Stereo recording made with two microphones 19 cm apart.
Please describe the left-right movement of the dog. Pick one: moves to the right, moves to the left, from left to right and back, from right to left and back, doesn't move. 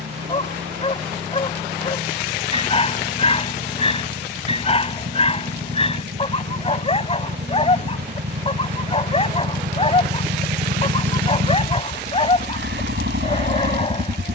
doesn't move.